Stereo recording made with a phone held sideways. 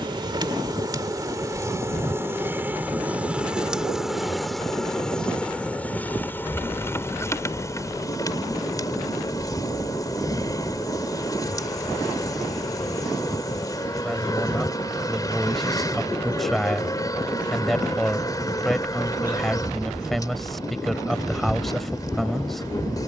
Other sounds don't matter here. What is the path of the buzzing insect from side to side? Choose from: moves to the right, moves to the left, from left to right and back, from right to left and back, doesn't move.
moves to the left.